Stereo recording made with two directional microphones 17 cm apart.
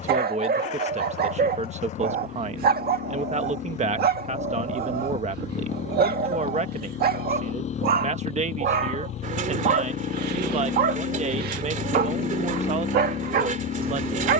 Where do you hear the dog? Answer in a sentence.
In this clip you hear the dog on the right.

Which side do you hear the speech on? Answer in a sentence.
You can hear the speech on the right.